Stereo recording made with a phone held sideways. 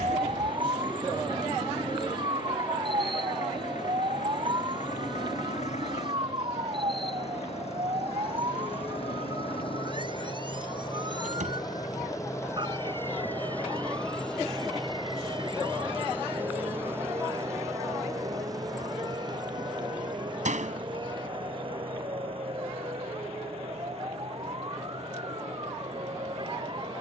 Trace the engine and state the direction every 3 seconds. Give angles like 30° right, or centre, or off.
80° left, 70° left, 60° left, 40° left, 10° left, 10° right, 30° right, 40° right, 50° right.